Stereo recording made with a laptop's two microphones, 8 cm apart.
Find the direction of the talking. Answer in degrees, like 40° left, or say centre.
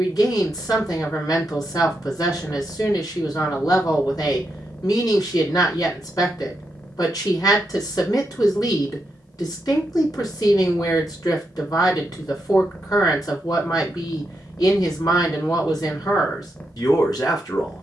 50° left.